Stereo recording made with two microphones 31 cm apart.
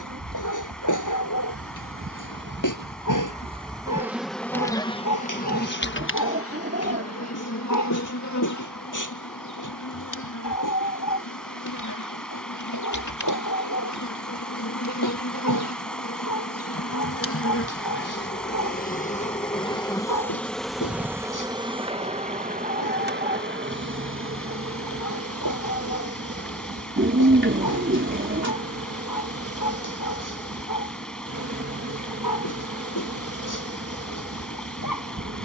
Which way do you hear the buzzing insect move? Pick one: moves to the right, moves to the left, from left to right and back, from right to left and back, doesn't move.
from right to left and back.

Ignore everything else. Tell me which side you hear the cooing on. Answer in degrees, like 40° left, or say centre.
40° right.